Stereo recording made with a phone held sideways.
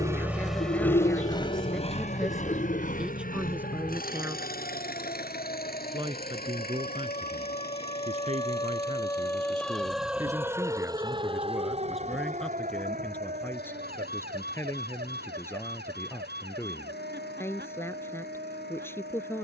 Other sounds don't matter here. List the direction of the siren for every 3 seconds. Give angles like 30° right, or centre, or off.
60° left, 60° left, 40° left, 10° right, 60° right, 80° right, 80° right.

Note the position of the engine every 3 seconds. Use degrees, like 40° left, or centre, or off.
30° left, 60° left, 70° left, 80° left, 80° left, 80° left, 80° left.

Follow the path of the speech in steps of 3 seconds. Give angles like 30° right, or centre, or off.
10° left, 10° right, 40° right, 20° right, 10° left, 10° left, 10° left.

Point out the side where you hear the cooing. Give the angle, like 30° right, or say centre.
50° left.